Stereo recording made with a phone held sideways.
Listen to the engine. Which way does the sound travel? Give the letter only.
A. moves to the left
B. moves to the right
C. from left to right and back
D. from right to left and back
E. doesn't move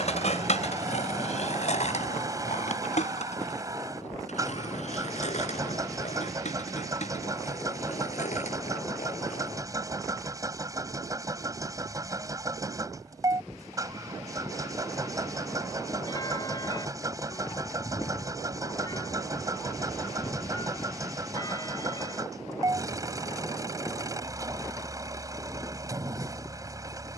E.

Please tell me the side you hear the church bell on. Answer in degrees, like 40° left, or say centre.
30° left.